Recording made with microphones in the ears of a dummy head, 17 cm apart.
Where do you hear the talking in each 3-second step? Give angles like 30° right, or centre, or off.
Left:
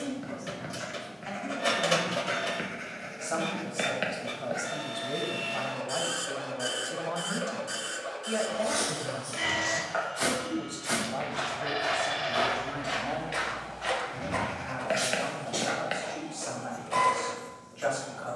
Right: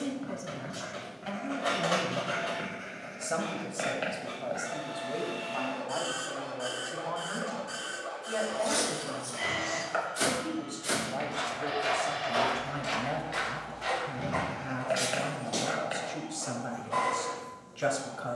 50° right, centre, 30° left, centre, 40° right, 40° right.